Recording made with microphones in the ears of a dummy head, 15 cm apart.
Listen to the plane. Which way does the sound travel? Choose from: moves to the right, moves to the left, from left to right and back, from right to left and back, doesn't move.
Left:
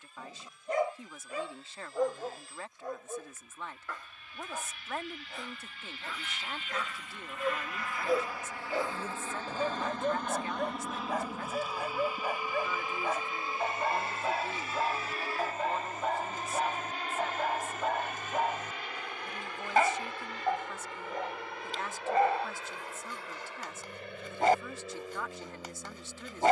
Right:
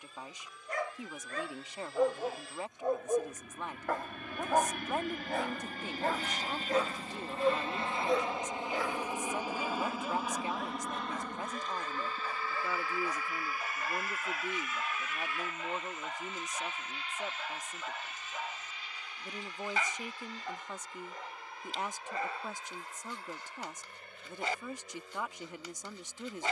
moves to the left.